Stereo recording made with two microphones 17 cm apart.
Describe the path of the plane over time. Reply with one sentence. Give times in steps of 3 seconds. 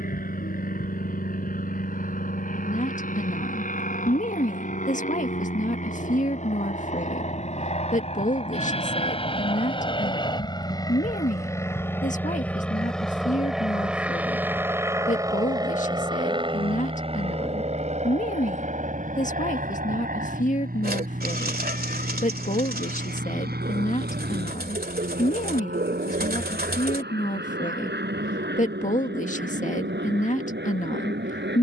You can hear the plane on the left from 0 s, in the centre from 12 s and on the right from 15 s.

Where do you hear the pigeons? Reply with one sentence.
You can hear the pigeons on the right.